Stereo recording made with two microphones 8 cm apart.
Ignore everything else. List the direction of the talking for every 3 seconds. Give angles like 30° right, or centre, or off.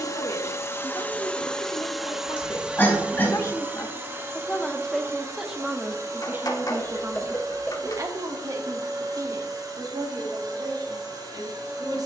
60° left, 10° left, 40° right, 60° right.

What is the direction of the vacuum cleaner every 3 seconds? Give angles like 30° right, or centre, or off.
10° left, 30° right, 50° right, 50° right.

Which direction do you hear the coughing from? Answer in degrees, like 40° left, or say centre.
30° left.